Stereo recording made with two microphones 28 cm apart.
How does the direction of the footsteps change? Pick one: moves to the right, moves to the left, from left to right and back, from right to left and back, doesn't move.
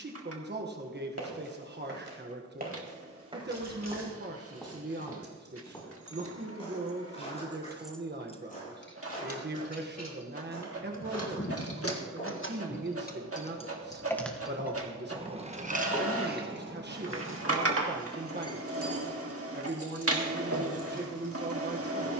moves to the left.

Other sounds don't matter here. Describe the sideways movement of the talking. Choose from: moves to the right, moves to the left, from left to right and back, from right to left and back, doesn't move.
doesn't move.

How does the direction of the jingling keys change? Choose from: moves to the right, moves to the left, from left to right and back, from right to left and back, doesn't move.
from right to left and back.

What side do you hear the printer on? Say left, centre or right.
right.